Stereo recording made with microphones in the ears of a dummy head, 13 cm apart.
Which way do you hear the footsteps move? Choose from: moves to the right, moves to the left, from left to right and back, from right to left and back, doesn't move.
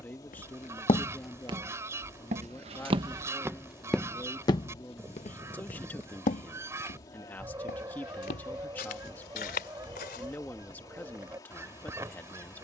from left to right and back.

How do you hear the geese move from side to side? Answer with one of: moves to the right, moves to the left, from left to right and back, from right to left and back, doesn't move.
doesn't move.